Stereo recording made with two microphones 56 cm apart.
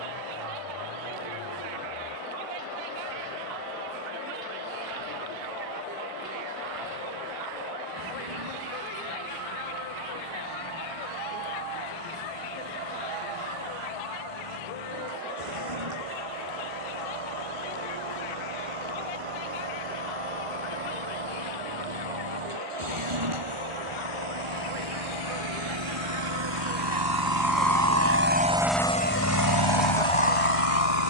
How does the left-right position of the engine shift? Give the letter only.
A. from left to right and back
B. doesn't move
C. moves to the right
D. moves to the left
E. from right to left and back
D.